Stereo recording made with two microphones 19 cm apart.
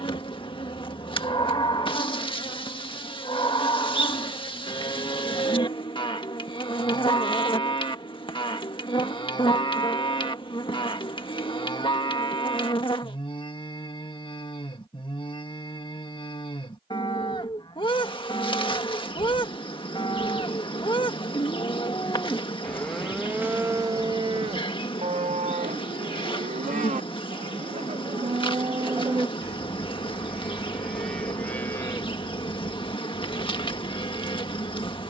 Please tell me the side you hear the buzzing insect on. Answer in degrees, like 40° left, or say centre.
30° left.